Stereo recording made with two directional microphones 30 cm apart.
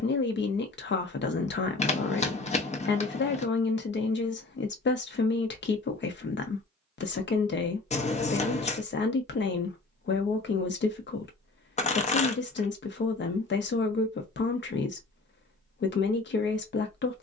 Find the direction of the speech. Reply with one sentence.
In this clip you hear the speech on the left.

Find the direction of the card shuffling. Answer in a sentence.
In this clip you hear the card shuffling on the left.